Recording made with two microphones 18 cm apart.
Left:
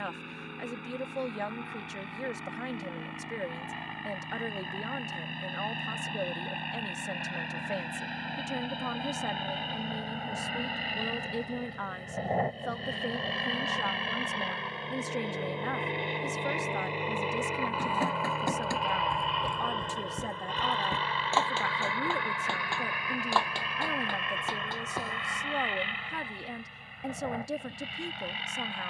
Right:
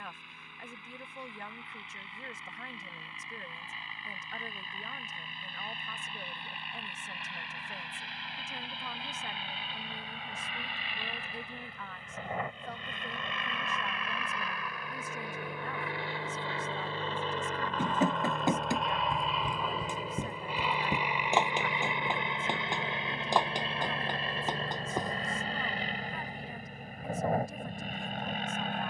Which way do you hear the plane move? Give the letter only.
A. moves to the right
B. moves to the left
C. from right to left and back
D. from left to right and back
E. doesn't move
A.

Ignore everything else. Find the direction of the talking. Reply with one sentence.
In this clip you hear the talking on the left.